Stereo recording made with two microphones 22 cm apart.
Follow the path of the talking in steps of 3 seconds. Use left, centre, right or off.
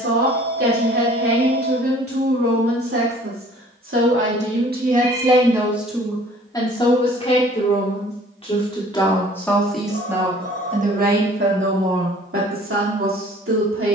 right, right, left, right, right.